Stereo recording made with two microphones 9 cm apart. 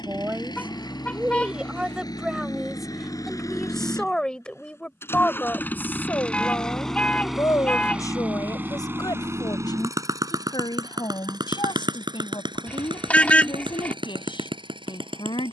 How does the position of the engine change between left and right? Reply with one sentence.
You can hear the engine go from the left side to the right.